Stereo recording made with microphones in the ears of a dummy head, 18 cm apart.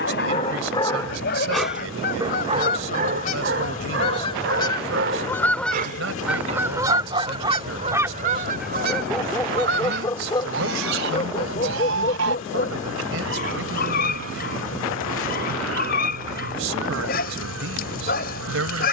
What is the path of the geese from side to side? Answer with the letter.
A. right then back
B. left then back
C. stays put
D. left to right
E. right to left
D.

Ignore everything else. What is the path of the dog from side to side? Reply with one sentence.
In this clip you hear the dog go right and come back.